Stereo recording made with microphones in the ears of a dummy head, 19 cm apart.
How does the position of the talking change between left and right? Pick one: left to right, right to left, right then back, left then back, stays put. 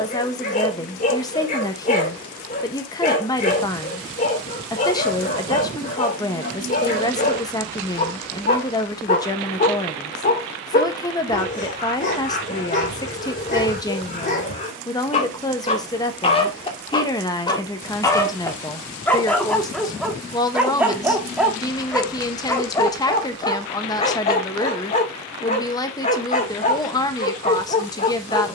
stays put.